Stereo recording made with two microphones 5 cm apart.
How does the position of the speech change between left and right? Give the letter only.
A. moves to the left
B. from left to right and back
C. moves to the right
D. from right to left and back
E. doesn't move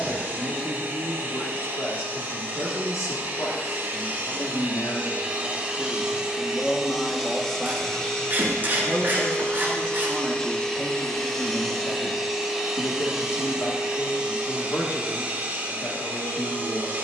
B.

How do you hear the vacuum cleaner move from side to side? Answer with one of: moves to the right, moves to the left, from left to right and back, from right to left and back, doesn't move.
from right to left and back.